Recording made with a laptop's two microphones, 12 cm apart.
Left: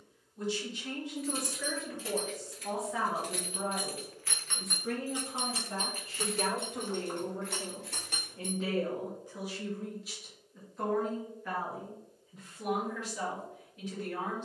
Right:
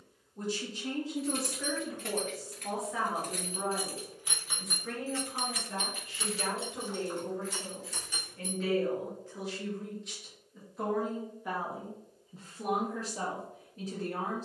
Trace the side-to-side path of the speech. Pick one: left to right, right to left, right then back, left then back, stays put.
left then back.